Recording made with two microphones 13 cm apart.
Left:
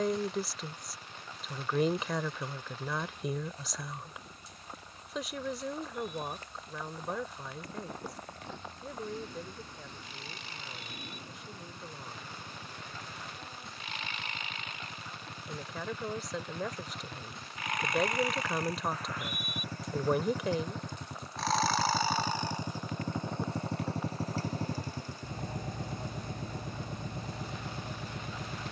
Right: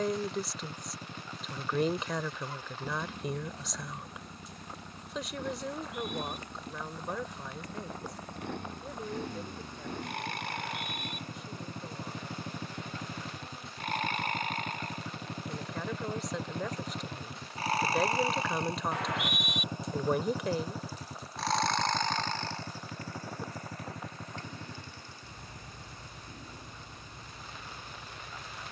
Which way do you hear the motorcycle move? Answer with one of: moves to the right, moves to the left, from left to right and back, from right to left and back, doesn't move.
moves to the left.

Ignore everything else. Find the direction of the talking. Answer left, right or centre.
centre.